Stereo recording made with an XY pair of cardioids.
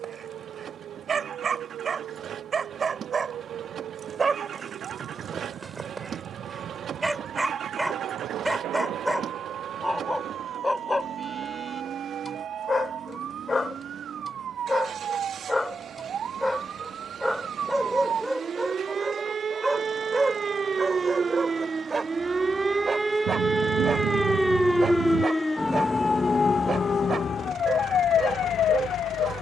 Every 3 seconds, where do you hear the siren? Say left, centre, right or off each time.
right, right, right, right, right, right, right, right, centre, left.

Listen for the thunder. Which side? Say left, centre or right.
right.